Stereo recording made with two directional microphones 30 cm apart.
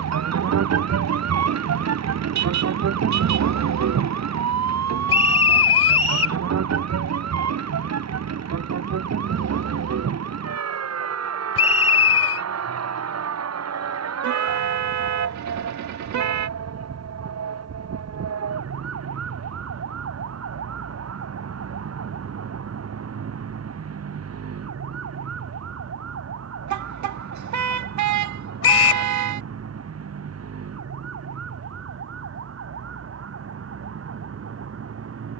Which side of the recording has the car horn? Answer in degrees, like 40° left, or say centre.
70° right.